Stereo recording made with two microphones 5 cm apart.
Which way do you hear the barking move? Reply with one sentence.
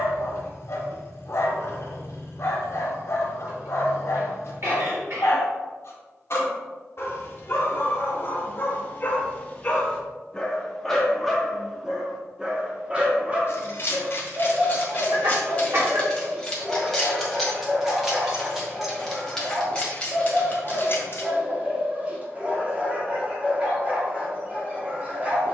In this clip you hear the barking travel towards the right.